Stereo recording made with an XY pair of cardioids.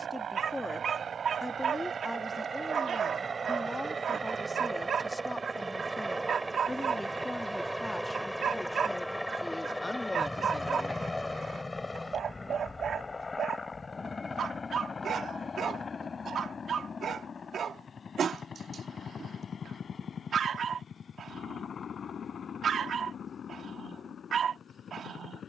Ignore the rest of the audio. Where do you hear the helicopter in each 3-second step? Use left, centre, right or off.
right, right, centre, centre, left, left, left, left, left.